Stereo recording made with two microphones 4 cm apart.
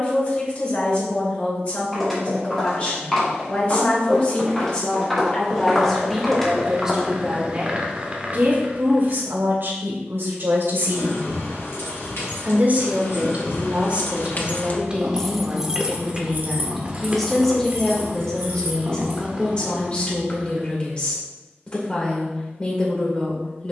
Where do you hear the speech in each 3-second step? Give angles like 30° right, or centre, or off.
30° left, 30° left, 20° right, 60° right, 30° right, centre, 20° left, 30° left.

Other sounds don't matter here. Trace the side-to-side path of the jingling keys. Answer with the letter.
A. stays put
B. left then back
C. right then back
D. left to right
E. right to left
D.